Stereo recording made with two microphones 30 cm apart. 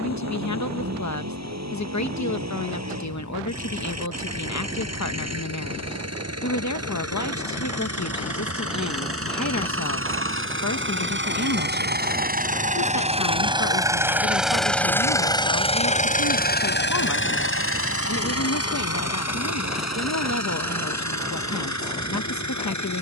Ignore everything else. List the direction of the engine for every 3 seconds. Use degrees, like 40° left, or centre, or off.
70° right, 60° right, 60° right, 40° right, 20° right, 30° left, 60° left, 70° left.